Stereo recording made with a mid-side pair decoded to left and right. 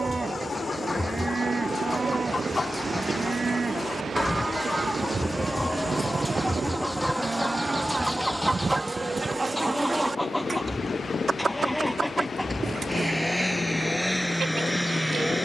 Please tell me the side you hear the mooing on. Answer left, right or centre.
right.